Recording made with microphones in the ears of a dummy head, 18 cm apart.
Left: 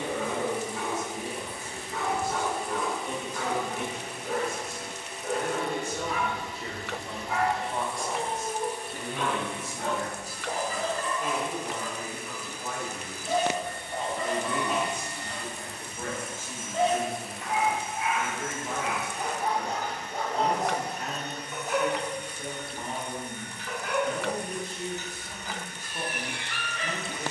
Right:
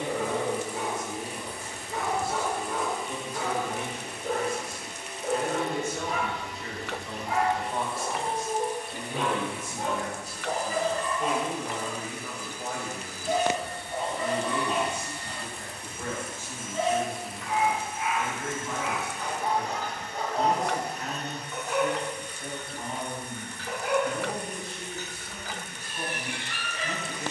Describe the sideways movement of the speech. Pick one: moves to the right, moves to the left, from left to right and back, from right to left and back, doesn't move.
from left to right and back.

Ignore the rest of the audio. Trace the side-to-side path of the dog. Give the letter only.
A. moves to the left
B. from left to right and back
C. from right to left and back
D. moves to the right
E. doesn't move
C.